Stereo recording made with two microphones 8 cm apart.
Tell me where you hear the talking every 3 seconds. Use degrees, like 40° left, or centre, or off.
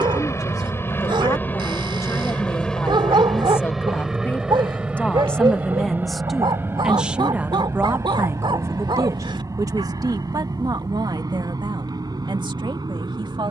40° left, 20° left, 20° right, 50° right, 70° right.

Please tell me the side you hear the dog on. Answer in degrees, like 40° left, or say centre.
70° right.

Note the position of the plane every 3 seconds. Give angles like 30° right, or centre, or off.
20° left, 10° right, 30° right, 40° right, 50° right.